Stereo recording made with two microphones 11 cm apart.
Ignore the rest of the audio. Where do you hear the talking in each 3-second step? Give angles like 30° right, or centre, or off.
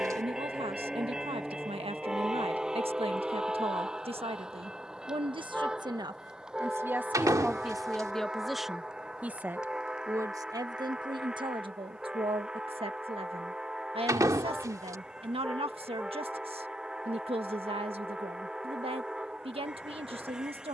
60° right, 60° right, 10° right, 40° right, 60° right, 60° right, 60° right.